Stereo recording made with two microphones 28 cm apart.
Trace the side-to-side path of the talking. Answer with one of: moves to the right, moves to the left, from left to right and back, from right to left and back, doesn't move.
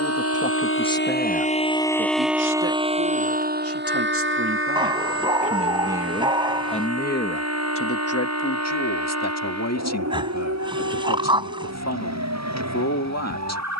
from left to right and back.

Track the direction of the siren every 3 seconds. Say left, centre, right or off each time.
left, right, right, right, right.